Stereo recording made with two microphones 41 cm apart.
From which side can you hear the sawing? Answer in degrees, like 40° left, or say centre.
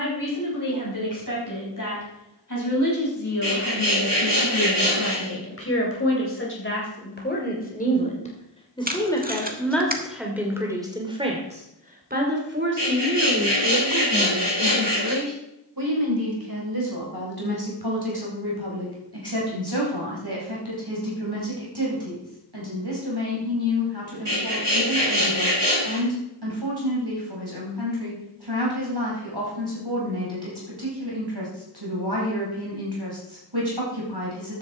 80° right.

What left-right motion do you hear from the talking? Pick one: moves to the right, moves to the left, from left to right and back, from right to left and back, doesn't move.
moves to the right.